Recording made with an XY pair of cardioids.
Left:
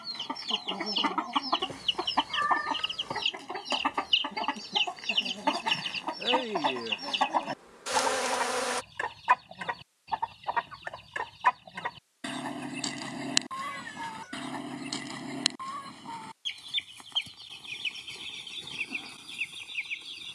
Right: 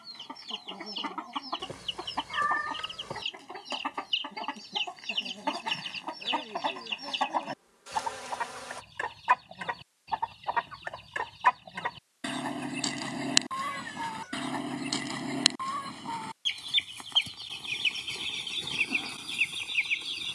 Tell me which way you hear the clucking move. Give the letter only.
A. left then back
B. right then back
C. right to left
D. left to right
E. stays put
D.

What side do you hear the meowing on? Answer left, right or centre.
centre.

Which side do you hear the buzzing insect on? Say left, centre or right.
left.